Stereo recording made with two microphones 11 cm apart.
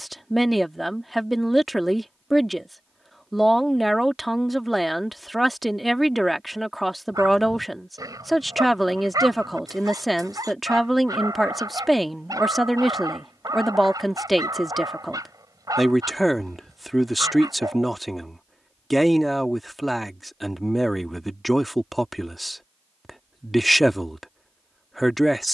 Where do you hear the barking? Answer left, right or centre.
right.